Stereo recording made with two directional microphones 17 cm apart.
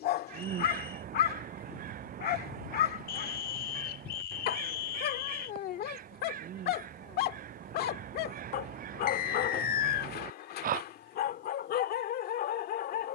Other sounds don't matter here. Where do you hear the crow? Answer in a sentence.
You can hear the crow on the right.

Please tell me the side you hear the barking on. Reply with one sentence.
You can hear the barking on the left.